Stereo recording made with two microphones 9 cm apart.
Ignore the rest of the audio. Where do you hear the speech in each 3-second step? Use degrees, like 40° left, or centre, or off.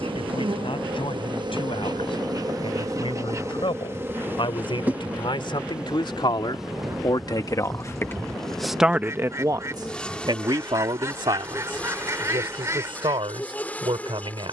80° left, 70° left, 40° left, 60° right, 80° right.